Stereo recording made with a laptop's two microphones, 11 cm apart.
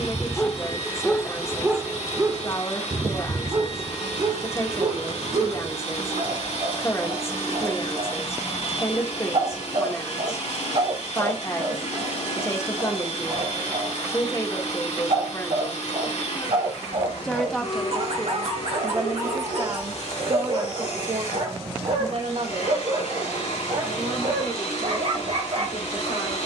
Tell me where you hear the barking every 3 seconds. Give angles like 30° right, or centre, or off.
centre, 50° right, 60° right, 60° right, 60° right, 60° right, 60° right, 60° right, 60° right.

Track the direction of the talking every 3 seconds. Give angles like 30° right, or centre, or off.
20° left, 20° left, 20° left, 20° left, 20° left, 10° left, 30° right, 60° right, 80° right.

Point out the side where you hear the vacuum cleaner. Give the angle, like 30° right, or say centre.
80° left.